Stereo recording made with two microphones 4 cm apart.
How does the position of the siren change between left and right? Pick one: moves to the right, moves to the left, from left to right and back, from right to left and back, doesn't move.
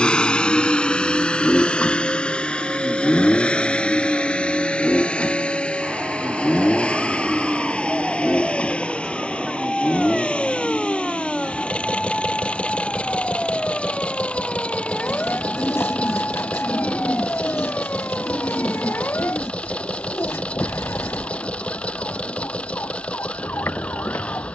moves to the left.